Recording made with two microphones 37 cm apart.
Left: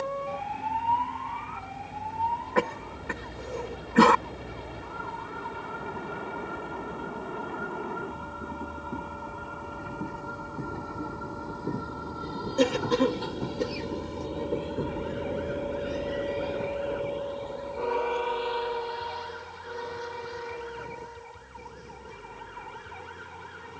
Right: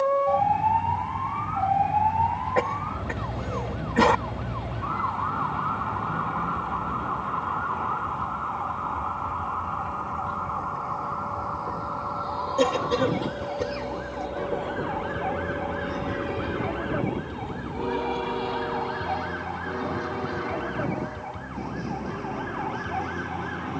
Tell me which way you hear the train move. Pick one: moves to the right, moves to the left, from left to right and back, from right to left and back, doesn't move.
moves to the right.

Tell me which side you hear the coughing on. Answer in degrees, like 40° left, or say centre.
20° left.